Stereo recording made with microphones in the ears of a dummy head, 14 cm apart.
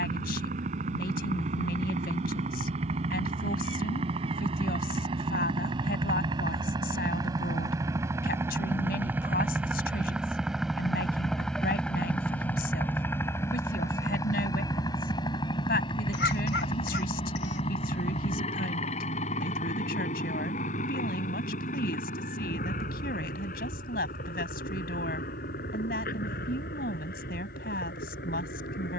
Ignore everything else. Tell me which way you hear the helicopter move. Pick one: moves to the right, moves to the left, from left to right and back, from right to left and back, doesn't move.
moves to the left.